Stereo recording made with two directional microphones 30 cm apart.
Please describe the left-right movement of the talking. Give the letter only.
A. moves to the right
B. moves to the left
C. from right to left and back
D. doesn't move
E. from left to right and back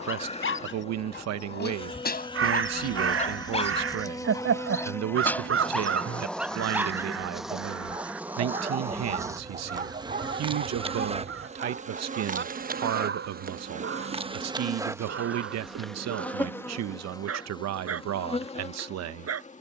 D.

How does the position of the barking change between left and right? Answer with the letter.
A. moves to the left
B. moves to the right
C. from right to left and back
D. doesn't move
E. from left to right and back
B.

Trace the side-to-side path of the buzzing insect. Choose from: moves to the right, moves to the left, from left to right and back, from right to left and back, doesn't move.
from left to right and back.